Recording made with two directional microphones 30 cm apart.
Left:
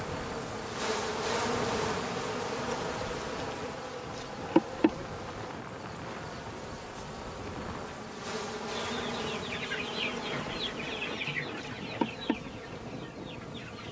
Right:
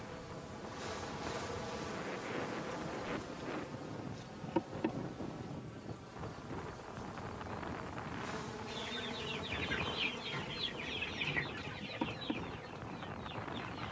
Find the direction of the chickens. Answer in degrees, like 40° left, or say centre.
20° left.